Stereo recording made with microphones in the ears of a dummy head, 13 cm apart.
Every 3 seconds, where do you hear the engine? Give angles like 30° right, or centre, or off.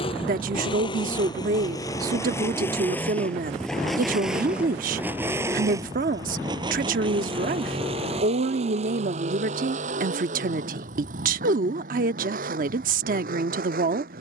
30° left, 10° right, 40° right, 60° right, 70° right.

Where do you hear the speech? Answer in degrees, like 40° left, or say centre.
60° right.